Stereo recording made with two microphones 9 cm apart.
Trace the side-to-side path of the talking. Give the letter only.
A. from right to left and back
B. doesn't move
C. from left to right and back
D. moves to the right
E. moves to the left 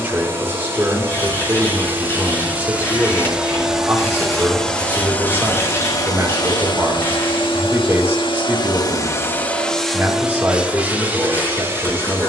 B.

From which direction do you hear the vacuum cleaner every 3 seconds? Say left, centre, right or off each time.
right, centre, left, centre.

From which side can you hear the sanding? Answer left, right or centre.
left.